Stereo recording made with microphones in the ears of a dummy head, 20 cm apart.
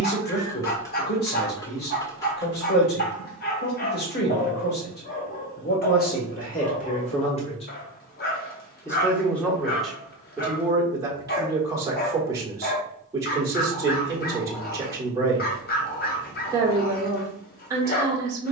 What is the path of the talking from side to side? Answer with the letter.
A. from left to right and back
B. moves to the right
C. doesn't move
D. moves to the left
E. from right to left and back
B.